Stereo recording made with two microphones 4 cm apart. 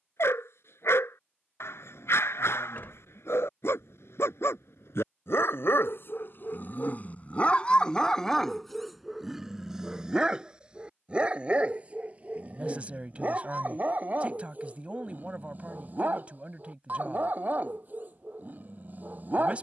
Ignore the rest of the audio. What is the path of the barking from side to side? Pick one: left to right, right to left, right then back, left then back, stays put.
left to right.